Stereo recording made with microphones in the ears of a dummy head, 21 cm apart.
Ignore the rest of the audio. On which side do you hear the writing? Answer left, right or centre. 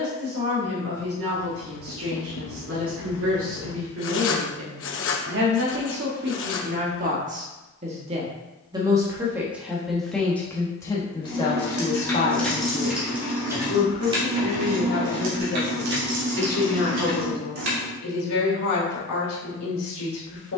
left.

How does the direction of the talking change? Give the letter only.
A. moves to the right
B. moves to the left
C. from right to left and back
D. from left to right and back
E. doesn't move
B.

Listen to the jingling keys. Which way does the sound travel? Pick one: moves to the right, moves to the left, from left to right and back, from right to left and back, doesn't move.
moves to the right.